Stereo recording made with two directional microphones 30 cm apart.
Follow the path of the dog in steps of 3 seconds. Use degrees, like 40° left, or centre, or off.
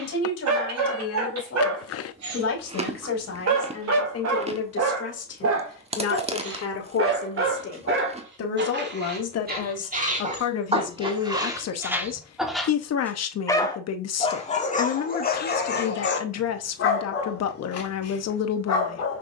60° right, 50° right, 40° right, 20° right, 10° left, 40° left, 50° left.